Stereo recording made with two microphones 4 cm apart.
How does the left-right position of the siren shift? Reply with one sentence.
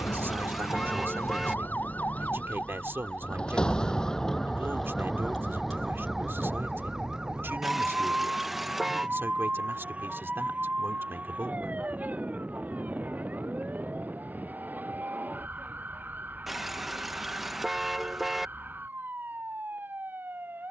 You can hear the siren go from the left side to the right.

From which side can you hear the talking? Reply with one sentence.
You can hear the talking on the right.